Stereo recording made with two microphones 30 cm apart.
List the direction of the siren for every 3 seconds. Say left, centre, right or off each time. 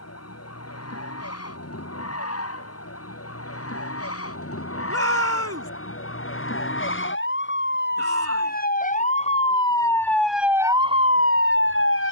left, left, left, centre.